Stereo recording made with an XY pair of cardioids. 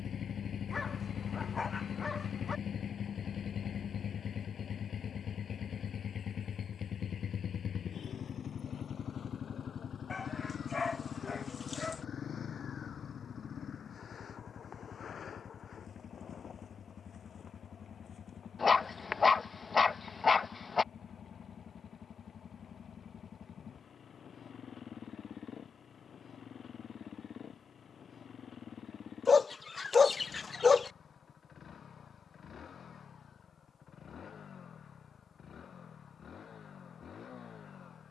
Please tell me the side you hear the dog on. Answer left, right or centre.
left.